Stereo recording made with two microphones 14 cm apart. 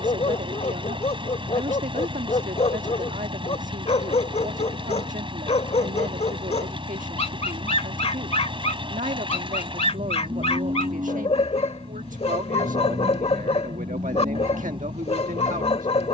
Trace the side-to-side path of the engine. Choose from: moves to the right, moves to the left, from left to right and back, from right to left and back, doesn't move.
doesn't move.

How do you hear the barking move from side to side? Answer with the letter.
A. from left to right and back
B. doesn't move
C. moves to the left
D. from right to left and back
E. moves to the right
B.